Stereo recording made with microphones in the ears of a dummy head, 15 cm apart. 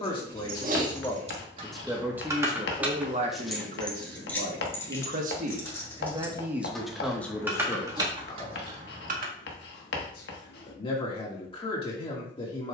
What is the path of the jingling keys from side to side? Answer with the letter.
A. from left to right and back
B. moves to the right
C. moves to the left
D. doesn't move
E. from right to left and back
E.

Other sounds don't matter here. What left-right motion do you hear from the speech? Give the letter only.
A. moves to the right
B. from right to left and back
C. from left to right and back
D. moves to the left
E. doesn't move
C.